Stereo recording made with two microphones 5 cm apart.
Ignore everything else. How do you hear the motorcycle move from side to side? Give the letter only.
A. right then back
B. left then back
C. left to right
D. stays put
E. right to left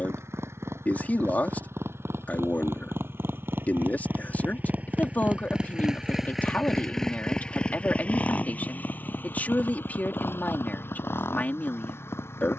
E.